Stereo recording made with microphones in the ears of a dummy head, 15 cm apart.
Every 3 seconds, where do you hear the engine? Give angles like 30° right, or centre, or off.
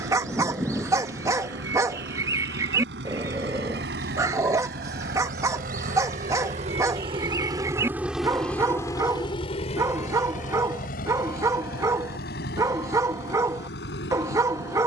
80° right, 70° right, 20° right, 50° left, 70° left.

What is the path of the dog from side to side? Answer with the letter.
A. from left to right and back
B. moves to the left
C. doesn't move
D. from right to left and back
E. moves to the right
C.